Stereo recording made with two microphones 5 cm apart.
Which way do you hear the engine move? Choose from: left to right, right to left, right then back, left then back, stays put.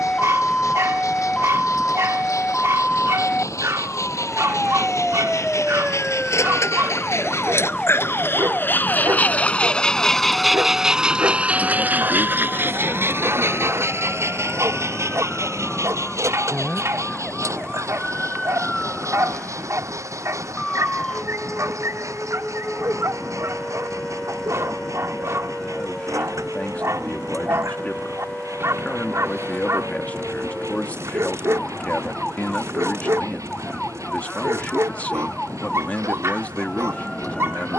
left to right.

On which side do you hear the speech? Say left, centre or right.
left.